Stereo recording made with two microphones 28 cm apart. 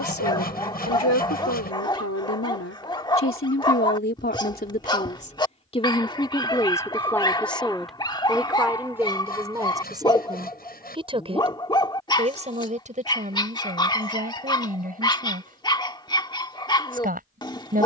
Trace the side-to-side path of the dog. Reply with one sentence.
You can hear the dog stay put.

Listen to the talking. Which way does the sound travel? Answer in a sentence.
In this clip you hear the talking move from left to right.